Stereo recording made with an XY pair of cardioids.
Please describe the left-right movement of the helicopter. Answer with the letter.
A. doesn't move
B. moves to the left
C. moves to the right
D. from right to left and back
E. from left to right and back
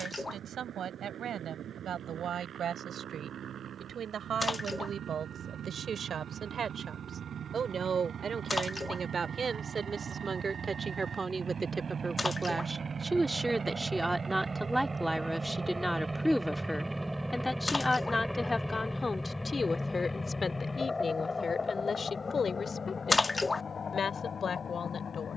B.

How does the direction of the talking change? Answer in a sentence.
You can hear the talking move from right to left.